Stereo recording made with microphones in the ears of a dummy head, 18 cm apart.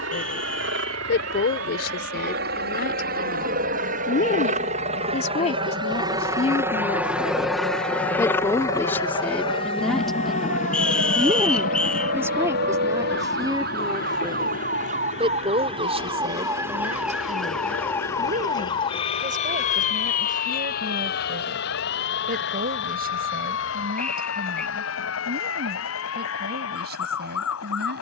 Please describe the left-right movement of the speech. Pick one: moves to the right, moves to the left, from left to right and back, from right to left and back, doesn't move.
moves to the right.